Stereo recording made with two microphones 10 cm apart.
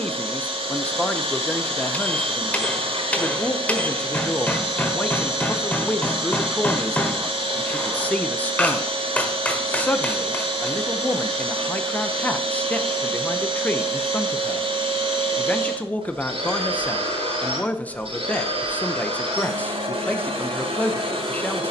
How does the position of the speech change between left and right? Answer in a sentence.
In this clip you hear the speech stay put.